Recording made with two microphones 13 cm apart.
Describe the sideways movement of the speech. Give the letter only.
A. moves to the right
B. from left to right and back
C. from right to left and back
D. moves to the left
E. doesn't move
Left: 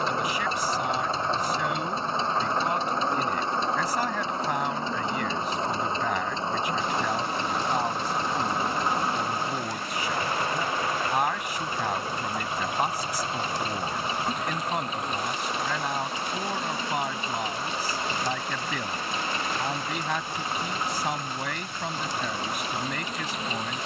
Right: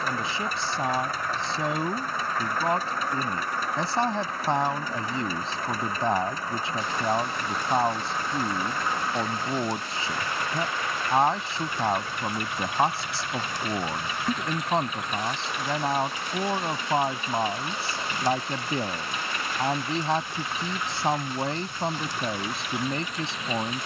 E.